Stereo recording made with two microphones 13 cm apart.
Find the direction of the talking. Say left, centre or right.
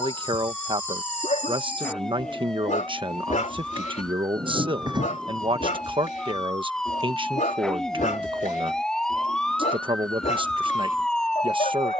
right.